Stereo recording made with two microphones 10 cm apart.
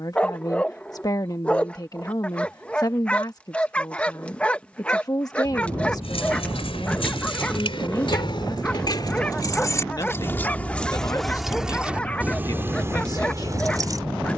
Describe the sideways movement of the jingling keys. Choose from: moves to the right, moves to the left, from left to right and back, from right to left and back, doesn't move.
moves to the right.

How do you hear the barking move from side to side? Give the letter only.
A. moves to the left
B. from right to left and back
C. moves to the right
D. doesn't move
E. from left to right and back
D.